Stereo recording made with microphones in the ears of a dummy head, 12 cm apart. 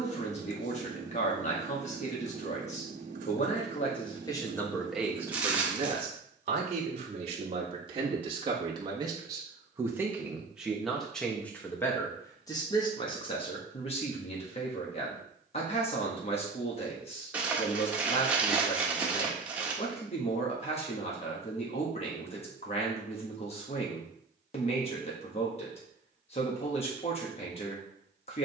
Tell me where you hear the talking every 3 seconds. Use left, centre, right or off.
left, centre, right, centre, left, left, left, left, left, left.